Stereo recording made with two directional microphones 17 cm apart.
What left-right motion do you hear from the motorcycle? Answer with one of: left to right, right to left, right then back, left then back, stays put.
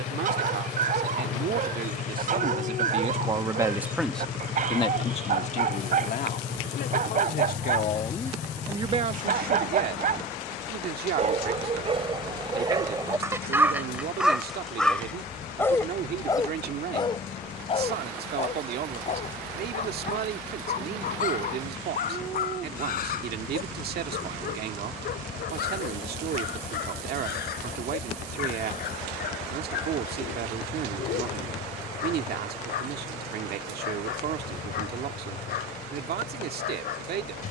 stays put.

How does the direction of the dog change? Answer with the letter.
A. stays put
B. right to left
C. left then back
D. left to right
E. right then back
B.